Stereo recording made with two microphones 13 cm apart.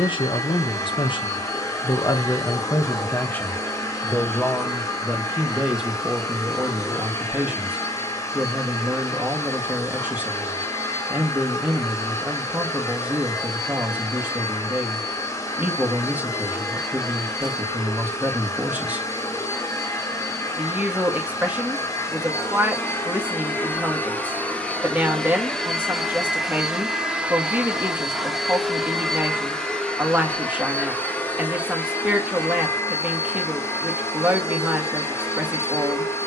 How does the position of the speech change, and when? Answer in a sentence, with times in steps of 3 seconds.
In this clip you hear the speech on the left from 0 s and in the centre from 3 s.